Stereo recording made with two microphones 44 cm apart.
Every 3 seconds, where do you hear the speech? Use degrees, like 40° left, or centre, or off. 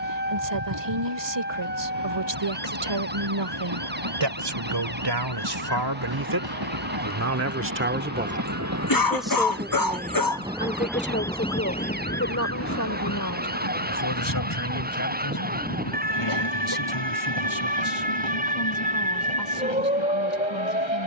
70° right, 60° right, 30° right, 20° left, 40° left, 50° left, 60° left.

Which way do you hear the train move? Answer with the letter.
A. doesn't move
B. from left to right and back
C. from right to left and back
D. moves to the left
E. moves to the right
D.